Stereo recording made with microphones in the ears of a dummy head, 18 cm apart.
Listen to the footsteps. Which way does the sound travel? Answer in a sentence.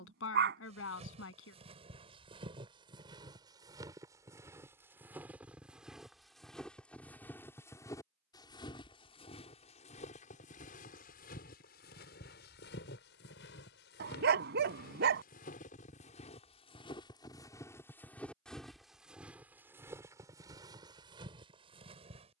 In this clip you hear the footsteps move from right to left and back again.